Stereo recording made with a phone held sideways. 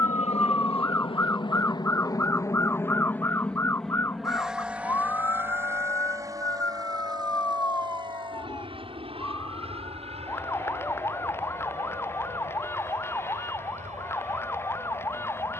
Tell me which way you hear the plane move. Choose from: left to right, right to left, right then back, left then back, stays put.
left to right.